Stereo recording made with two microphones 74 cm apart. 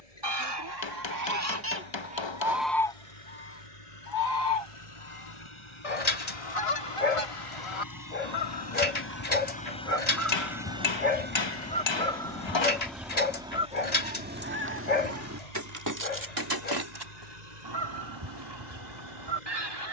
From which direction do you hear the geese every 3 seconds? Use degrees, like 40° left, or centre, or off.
20° right, 40° left, 40° left, 20° left, 10° right, 30° right, 40° right.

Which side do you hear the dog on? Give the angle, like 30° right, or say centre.
60° left.